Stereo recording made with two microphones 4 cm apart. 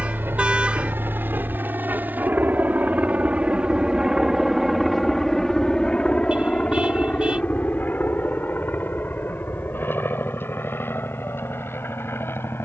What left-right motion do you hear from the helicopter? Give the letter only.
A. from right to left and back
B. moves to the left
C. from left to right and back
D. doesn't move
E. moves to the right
B.